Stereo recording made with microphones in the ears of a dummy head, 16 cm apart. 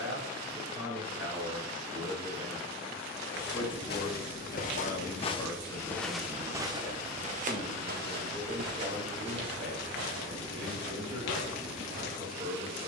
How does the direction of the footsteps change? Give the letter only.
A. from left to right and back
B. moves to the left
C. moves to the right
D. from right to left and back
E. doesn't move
C.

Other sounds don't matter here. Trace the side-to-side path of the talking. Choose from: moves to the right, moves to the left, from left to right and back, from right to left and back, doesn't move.
from right to left and back.